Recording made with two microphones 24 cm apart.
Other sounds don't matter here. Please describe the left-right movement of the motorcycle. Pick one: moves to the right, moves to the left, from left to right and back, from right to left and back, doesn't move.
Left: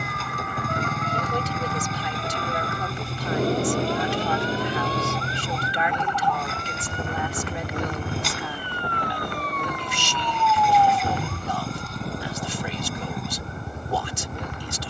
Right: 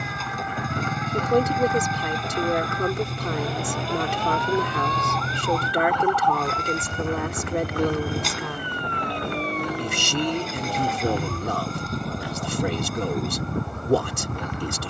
doesn't move.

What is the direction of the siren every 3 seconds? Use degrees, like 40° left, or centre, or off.
60° left, 40° left, centre, 40° right, 60° right.